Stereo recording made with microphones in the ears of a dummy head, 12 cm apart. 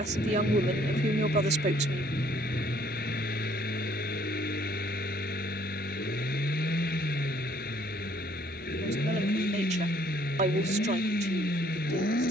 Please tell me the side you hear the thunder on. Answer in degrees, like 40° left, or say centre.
40° left.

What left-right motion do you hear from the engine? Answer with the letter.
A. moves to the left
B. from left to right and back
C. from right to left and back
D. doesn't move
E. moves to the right
D.